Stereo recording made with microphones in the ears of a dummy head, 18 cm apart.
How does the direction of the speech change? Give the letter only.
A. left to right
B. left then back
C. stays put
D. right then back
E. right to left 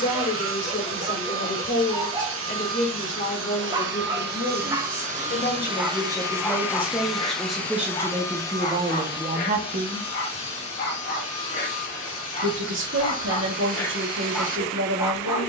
A.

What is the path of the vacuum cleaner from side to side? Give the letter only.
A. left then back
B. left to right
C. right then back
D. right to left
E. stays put
D.